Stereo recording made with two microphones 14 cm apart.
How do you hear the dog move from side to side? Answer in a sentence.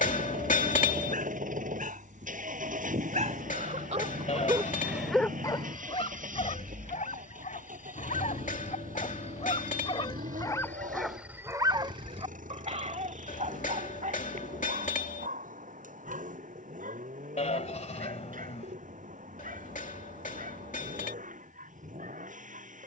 In this clip you hear the dog go left and come back.